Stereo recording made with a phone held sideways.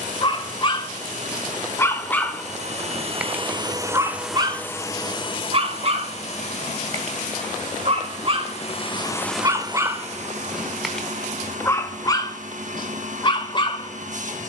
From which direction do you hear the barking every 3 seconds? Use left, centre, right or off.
left, right, right, centre, left.